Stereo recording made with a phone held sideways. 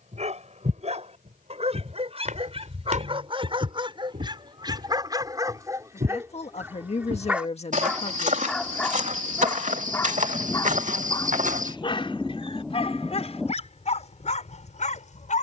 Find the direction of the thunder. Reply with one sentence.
In this clip you hear the thunder in the centre.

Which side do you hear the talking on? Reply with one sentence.
You can hear the talking on the left.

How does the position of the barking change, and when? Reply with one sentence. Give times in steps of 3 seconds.
In this clip you hear the barking on the right from 0 s, in the centre from 6 s and on the left from 9 s.